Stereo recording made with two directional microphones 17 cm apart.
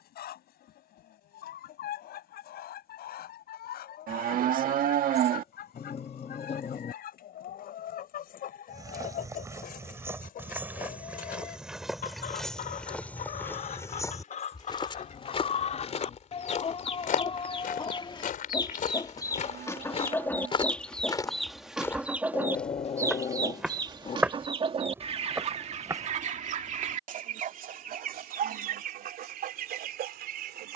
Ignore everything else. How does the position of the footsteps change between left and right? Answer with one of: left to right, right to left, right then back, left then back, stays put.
left then back.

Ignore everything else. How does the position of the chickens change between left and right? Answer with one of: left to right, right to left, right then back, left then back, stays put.
left to right.